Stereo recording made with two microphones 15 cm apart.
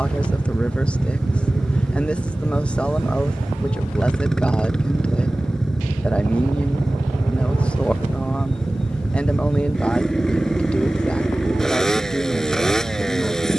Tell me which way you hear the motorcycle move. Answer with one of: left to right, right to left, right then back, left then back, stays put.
stays put.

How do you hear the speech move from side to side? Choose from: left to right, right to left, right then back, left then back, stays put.
stays put.